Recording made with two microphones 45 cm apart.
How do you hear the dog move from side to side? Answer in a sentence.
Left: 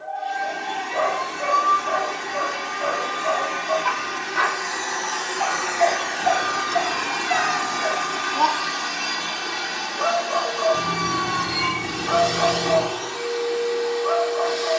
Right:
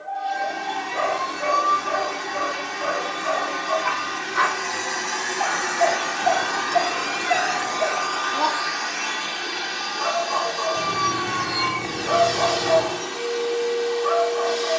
You can hear the dog go right and come back.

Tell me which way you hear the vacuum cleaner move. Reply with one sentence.
You can hear the vacuum cleaner go left and come back.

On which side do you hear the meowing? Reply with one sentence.
In this clip you hear the meowing on the left.